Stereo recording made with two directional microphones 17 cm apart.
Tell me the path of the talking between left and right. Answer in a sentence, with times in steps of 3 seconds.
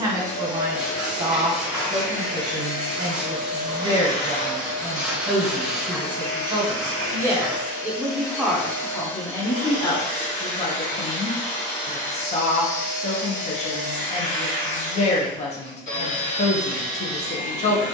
You can hear the talking on the right from 0 s, in the centre from 6 s and on the left from 9 s.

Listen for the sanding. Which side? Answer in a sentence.
You can hear the sanding in the centre.